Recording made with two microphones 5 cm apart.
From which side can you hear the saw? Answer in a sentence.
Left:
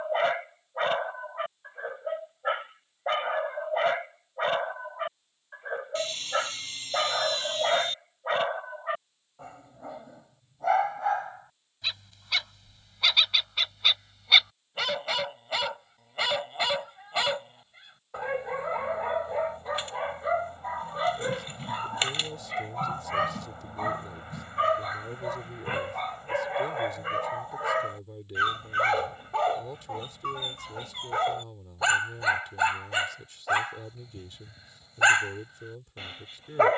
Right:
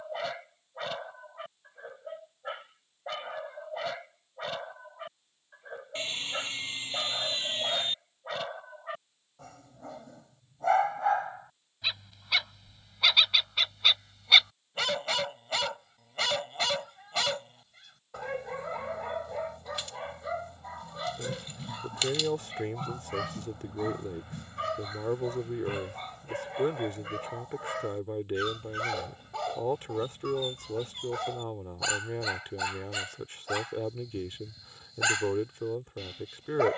In this clip you hear the saw on the right.